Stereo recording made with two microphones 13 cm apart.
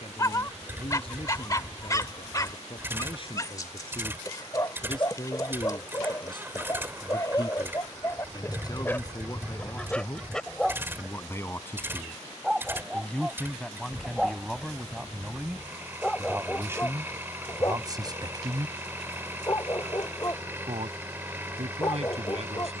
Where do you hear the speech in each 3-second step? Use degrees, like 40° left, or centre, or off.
50° left, 40° left, 30° left, 20° left, centre, 20° right, 40° right, 60° right.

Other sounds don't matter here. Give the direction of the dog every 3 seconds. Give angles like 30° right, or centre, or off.
30° left, 30° left, 30° left, 10° left, 10° right, 20° left, 30° left, 30° left.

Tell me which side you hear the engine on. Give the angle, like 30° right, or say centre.
20° right.